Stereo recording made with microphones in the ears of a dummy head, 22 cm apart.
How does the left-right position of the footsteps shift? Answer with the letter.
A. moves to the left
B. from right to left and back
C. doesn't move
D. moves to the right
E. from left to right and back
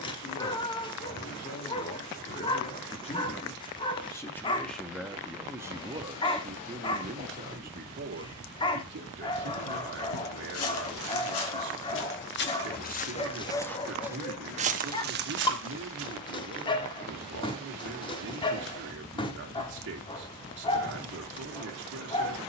D.